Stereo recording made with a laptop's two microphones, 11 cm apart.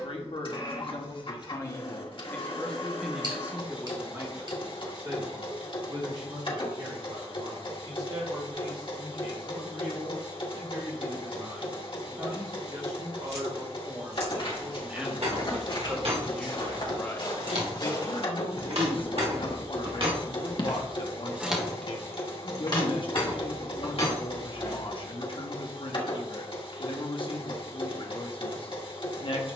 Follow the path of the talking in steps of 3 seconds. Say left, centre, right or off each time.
left, right, right, right, right, centre, left, left, left, left.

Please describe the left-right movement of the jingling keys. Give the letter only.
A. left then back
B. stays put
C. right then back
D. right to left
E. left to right
D.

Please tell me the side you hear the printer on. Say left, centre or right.
left.